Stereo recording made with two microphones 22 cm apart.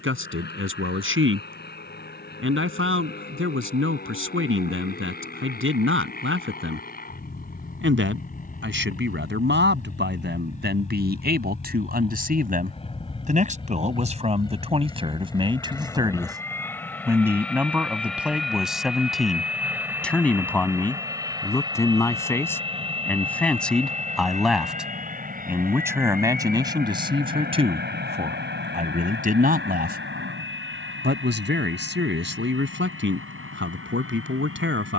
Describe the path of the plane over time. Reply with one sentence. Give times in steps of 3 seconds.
You can hear the plane on the left from 0 s, in the centre from 15 s and on the right from 21 s.